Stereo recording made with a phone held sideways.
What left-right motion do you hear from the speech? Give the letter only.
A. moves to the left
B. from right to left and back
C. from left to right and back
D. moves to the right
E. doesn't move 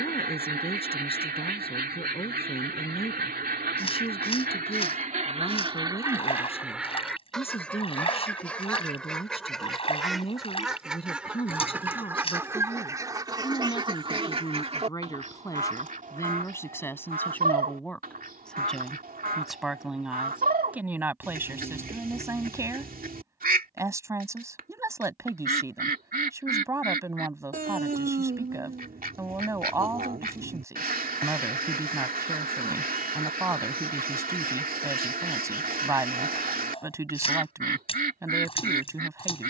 D.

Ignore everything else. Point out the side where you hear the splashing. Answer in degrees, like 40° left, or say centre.
40° left.